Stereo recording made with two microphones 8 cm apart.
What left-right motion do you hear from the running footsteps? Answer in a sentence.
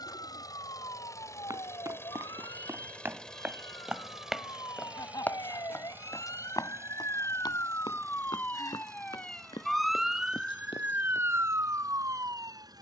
You can hear the running footsteps go from the right side to the left.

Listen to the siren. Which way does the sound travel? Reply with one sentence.
In this clip you hear the siren move from left to right.